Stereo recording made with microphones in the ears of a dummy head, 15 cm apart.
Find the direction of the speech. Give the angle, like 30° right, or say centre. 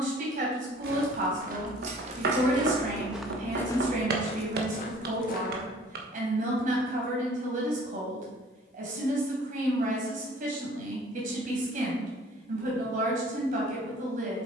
50° right.